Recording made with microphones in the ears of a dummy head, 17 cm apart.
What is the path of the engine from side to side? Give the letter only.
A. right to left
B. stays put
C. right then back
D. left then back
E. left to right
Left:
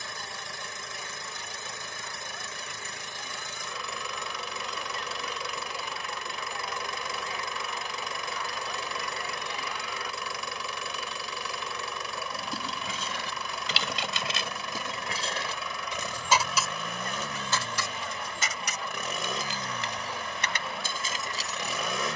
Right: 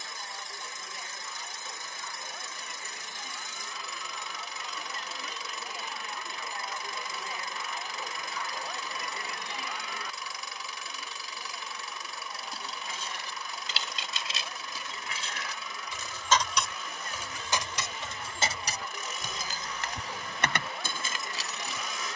B.